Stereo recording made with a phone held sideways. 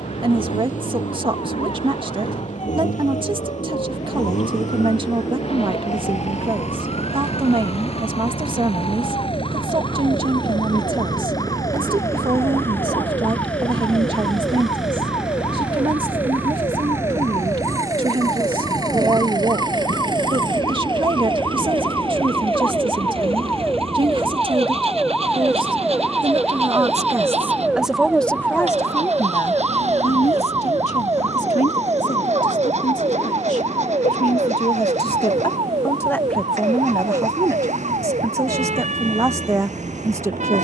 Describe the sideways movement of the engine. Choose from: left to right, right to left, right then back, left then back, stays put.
left to right.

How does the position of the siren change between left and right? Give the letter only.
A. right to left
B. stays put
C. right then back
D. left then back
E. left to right
E.